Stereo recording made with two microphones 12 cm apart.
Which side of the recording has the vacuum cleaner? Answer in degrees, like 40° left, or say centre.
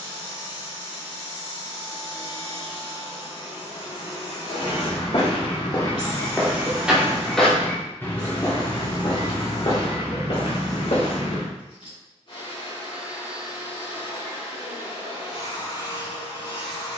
50° left.